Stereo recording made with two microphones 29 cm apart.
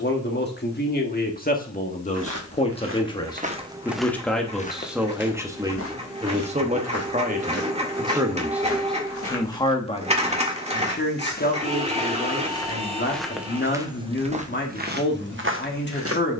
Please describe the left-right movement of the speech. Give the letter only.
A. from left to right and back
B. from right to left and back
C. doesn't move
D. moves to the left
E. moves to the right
A.